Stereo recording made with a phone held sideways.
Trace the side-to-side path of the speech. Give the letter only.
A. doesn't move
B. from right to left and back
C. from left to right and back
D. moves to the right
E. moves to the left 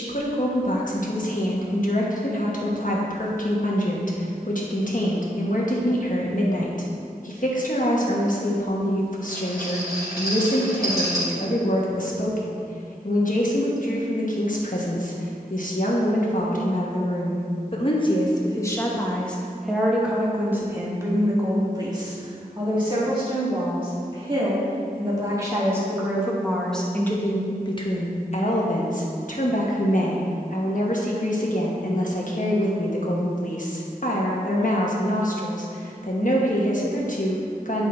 C.